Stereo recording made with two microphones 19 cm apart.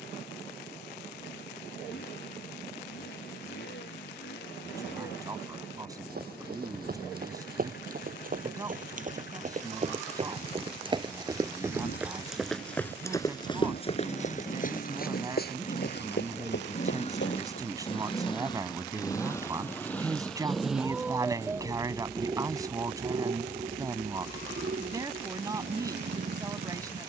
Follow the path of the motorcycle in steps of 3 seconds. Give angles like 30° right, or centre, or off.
70° left, 60° left, 60° left, 60° left, 50° left, 40° left, 10° left, 30° right, 50° right.